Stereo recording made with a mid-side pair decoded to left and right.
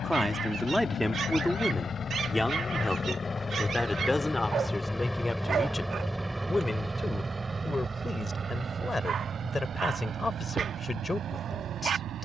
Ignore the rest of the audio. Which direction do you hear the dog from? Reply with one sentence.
You can hear the dog on the right.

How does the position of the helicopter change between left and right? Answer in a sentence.
In this clip you hear the helicopter travel towards the right.